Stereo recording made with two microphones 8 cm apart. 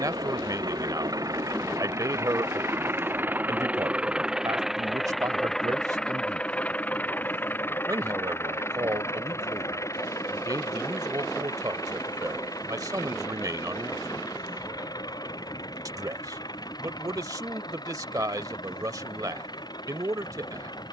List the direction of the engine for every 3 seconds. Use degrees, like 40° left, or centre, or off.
40° right, 10° right, 20° left, 40° left, 50° left, 60° left, 60° left.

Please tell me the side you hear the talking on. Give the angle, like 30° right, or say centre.
50° right.